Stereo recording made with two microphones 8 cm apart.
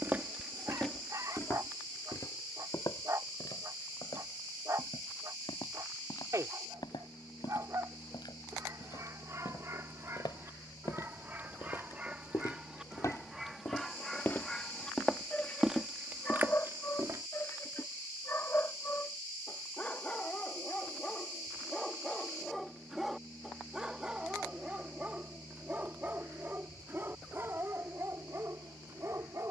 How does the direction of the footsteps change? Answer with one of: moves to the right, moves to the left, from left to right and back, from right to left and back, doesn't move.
from right to left and back.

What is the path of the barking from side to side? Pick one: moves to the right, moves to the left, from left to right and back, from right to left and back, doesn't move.
from right to left and back.